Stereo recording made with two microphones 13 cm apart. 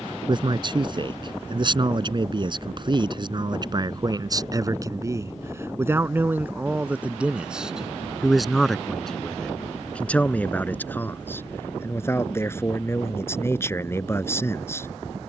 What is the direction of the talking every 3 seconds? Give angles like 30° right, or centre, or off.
40° right, 30° right, 10° right, 10° left, 20° left.